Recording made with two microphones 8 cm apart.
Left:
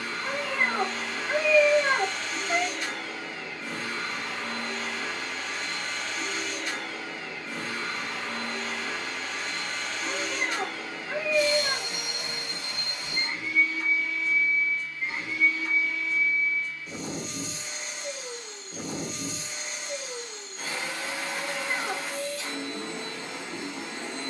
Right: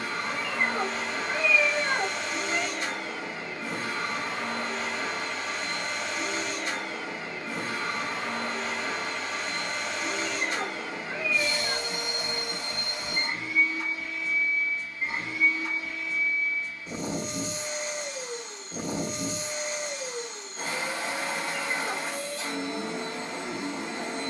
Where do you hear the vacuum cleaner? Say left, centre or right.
right.